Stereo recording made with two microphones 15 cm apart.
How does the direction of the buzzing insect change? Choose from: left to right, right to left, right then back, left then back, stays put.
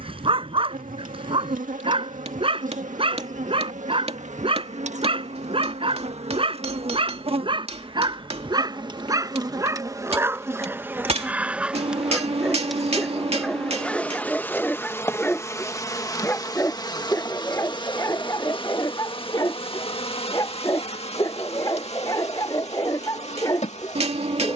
right to left.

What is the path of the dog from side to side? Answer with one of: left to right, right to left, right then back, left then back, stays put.
right to left.